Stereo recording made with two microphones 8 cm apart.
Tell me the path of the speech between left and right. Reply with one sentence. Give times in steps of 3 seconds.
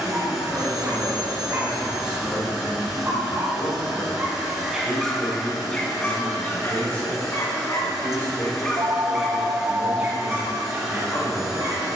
In this clip you hear the speech in the centre from 0 s and on the left from 6 s.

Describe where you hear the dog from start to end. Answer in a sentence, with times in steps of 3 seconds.
In this clip you hear the dog on the right from 0 s, in the centre from 3 s, on the left from 6 s and on the right from 9 s.